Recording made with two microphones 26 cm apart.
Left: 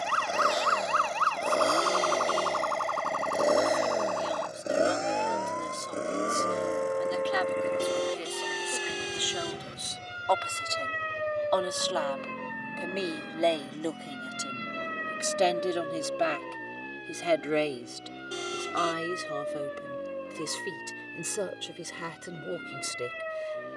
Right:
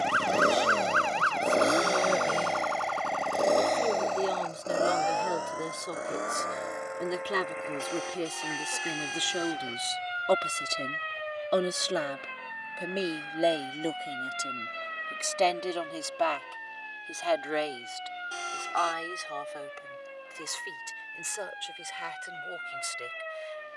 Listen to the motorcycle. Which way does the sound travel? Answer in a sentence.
In this clip you hear the motorcycle move from right to left.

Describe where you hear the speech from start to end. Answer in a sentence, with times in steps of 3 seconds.
In this clip you hear the speech on the right from 0 s, in the centre from 12 s and on the left from 15 s.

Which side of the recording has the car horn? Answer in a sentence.
You can hear the car horn on the left.